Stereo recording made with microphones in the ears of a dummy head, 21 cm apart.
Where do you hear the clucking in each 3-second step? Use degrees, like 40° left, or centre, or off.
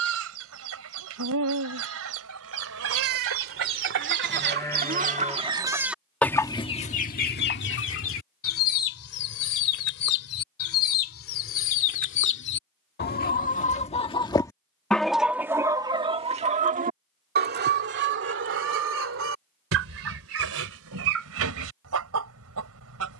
70° right, 40° right, 40° left, 60° left, 30° left, 30° right, 60° right, 70° right.